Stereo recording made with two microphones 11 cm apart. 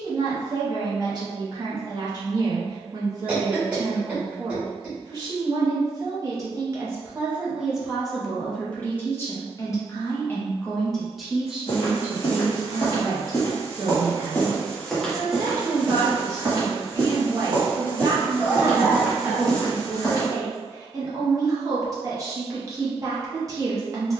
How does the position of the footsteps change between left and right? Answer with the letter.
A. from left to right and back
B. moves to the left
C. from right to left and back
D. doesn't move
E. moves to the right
A.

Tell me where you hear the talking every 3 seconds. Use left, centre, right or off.
right, right, centre, centre, right, right, right, right.